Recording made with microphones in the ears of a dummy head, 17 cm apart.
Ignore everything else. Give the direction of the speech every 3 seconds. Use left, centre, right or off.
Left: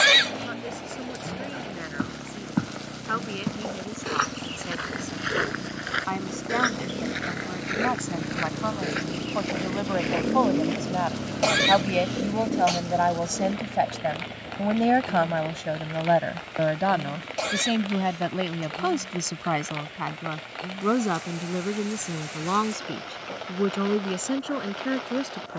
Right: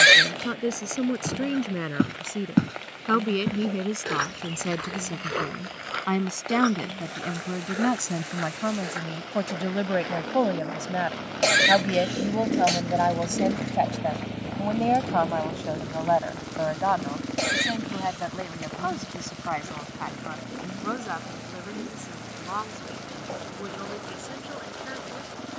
right, right, right, right, centre, left, left, left, left.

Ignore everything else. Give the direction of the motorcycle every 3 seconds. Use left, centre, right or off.
left, left, left, left, right, right, right, right, right.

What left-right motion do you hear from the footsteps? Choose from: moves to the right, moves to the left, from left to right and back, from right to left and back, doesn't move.
moves to the left.